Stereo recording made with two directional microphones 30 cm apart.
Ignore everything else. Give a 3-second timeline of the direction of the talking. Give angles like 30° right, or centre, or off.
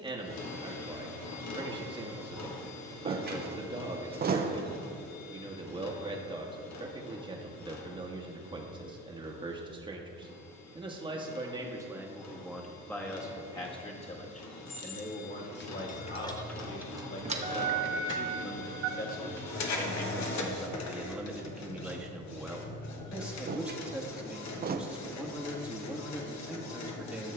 20° right, 20° right, 20° right, 20° right, 10° left, 40° left, 20° left, centre, centre.